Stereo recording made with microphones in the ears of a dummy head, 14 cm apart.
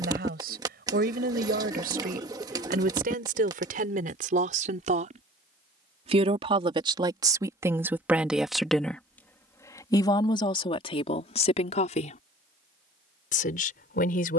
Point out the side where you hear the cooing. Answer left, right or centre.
right.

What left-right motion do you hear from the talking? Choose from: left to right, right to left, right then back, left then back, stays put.
right to left.